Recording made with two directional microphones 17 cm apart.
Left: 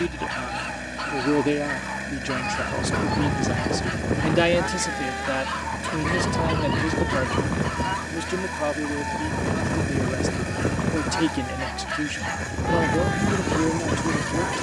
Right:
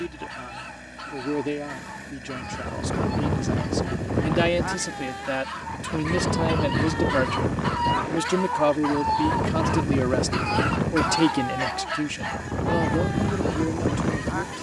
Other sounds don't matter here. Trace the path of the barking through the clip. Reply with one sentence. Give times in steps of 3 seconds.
You can hear the barking on the left from 0 s, in the centre from 6 s, on the right from 9 s and on the left from 12 s.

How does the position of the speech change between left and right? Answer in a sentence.
In this clip you hear the speech go right and come back.